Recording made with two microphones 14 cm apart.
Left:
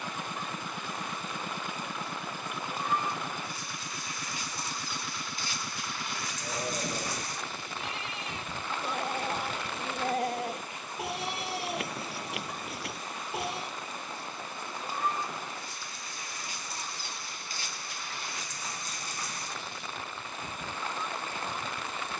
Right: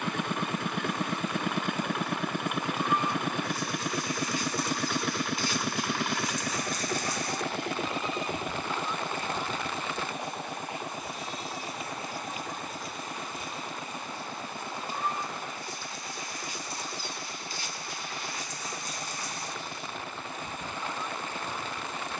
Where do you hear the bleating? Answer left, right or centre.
left.